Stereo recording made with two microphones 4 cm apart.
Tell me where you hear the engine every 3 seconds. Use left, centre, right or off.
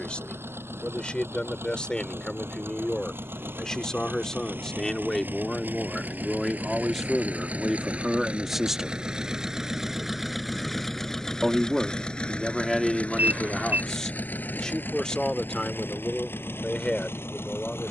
right, right, right, centre, left, left.